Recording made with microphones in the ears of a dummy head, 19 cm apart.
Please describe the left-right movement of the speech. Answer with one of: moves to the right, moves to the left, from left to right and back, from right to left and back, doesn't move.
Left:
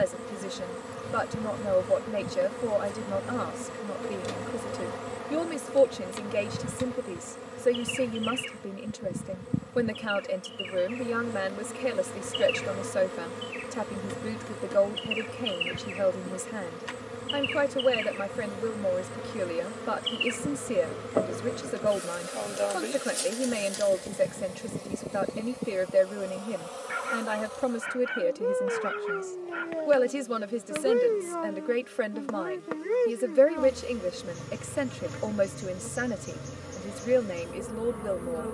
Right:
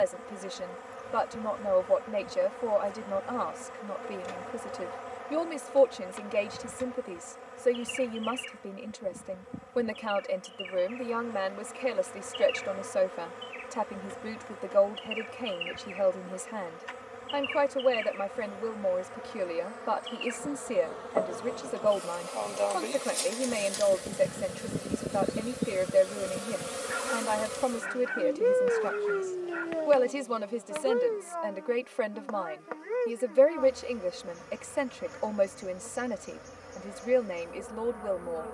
doesn't move.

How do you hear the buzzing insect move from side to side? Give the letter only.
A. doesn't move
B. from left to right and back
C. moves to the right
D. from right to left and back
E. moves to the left
B.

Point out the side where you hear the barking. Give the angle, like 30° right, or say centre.
50° left.